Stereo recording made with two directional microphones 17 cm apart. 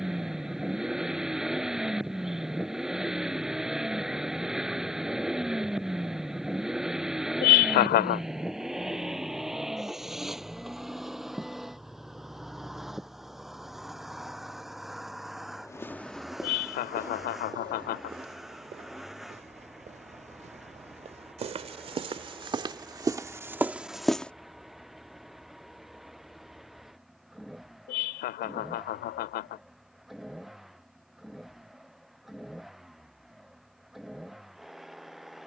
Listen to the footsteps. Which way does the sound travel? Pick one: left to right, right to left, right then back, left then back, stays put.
right then back.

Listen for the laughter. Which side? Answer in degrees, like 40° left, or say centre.
70° left.